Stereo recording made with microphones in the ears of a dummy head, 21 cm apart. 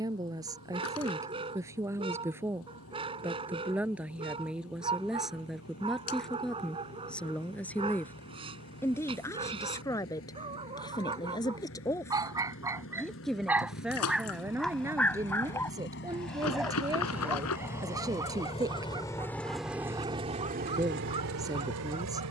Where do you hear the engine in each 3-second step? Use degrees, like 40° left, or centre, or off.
60° left, 60° left, 60° left, 60° left, 50° left, 40° left, centre, 70° right.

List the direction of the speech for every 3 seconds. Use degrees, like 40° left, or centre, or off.
10° right, centre, centre, 10° left, centre, 10° right, 10° right, 10° right.